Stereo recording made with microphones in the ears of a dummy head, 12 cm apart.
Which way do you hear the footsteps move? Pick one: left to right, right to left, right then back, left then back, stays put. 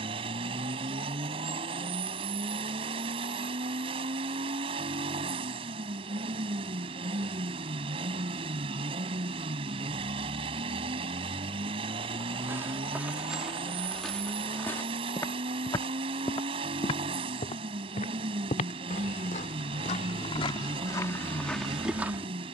left then back.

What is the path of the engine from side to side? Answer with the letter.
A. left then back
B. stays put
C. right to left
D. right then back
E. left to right
B.